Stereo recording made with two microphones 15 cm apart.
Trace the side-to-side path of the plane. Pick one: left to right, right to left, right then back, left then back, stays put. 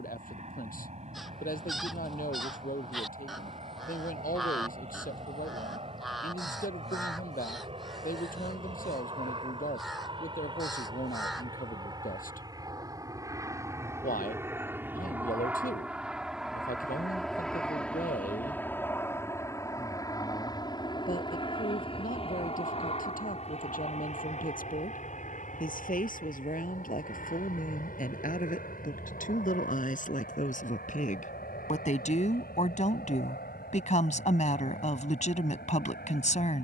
right to left.